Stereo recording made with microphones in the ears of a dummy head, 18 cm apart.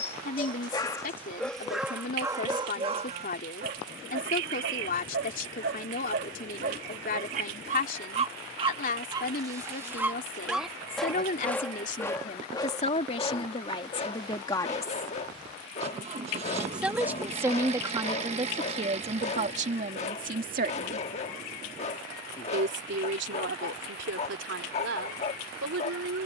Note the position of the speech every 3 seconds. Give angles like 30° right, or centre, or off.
40° left, 40° left, 40° left, 40° left, 30° left, 10° right, 40° right, 60° right, 70° right.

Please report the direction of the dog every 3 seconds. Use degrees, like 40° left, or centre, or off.
centre, 50° right, 40° right, centre, 20° left, 30° left, 30° left, 30° left, 30° left.